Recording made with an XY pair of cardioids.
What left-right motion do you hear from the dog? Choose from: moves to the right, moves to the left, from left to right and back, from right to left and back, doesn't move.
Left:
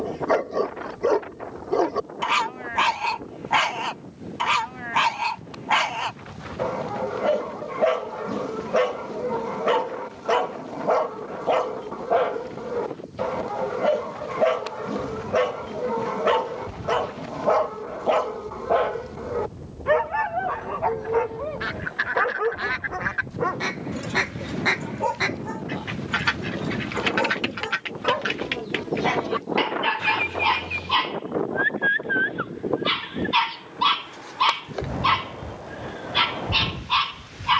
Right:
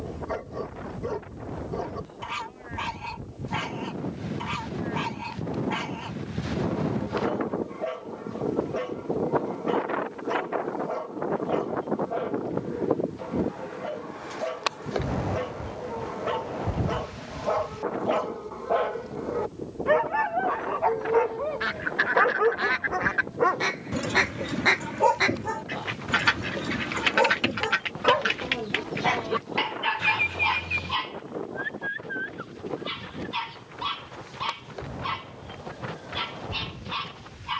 from left to right and back.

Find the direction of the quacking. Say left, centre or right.
centre.